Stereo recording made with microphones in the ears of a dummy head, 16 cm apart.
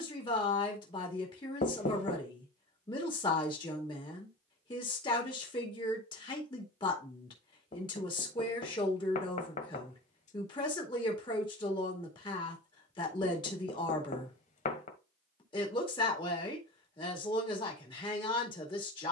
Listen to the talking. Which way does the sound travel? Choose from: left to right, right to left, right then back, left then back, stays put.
stays put.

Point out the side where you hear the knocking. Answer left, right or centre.
left.